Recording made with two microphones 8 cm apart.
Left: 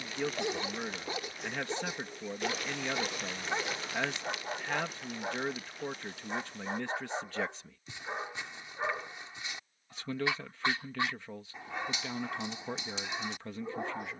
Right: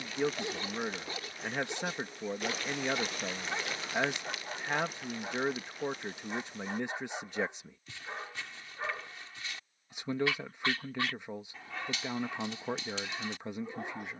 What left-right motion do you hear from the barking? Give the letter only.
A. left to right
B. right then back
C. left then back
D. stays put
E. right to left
D.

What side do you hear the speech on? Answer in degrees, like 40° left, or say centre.
20° right.